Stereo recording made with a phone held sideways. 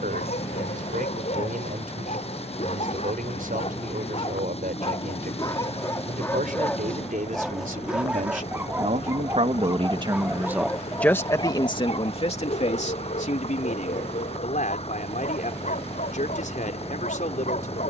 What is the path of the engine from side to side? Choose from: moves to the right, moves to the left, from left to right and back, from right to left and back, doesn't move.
doesn't move.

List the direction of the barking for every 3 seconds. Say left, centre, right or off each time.
left, left, centre, centre, left, left.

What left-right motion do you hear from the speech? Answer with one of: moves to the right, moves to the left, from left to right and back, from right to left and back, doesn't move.
moves to the left.